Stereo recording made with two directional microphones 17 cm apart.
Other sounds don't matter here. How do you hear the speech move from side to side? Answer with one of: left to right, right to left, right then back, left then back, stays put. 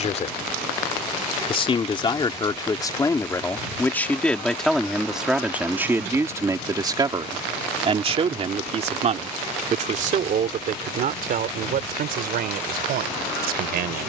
left to right.